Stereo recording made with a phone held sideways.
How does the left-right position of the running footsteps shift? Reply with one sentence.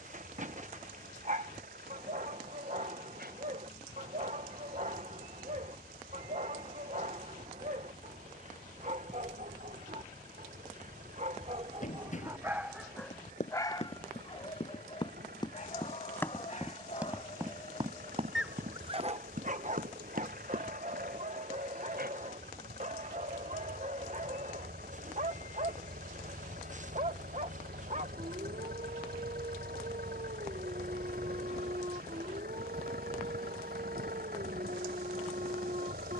In this clip you hear the running footsteps move to the right.